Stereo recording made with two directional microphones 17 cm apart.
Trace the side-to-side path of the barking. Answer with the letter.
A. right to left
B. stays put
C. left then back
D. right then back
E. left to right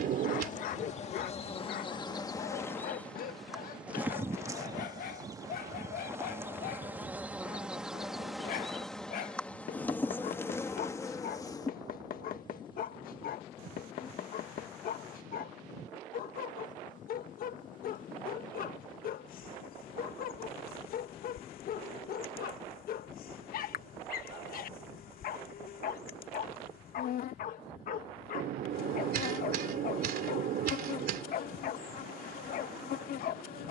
B.